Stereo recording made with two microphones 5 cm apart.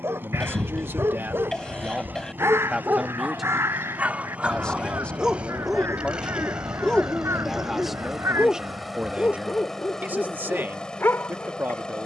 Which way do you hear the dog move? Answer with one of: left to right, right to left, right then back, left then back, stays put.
right to left.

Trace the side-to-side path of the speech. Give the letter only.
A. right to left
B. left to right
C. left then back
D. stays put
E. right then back
C.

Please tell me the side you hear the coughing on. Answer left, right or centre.
centre.